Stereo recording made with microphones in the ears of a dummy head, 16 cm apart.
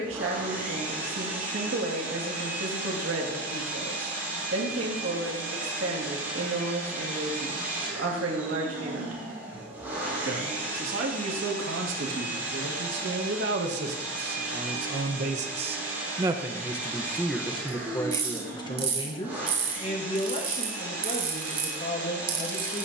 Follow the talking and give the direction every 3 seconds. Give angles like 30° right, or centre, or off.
80° right, 80° right, 80° right, 80° right, 70° right, 10° right, 30° left, 40° left.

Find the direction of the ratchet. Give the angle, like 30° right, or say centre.
30° right.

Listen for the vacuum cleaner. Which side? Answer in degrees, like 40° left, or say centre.
10° right.